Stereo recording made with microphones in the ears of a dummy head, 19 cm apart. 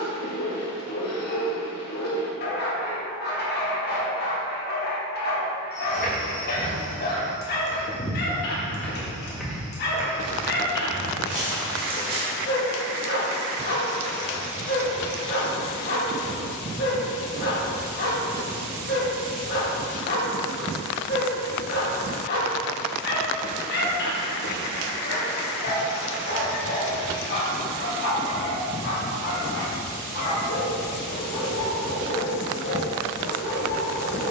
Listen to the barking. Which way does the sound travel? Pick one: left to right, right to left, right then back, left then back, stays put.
stays put.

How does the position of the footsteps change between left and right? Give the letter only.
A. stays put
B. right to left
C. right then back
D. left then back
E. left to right
E.